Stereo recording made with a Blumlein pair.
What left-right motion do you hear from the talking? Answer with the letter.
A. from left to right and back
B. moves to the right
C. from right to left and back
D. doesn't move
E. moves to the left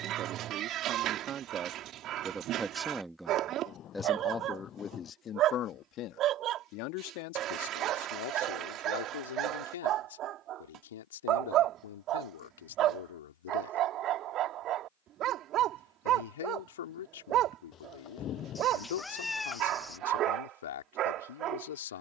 E.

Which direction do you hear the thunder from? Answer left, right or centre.
left.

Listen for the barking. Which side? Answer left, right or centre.
right.